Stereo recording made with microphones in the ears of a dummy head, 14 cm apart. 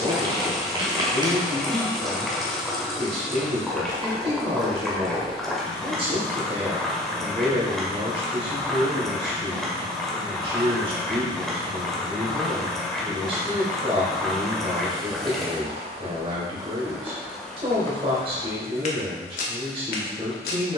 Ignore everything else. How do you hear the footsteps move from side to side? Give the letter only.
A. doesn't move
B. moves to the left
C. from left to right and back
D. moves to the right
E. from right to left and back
B.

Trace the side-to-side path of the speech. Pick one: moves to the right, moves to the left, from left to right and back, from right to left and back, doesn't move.
doesn't move.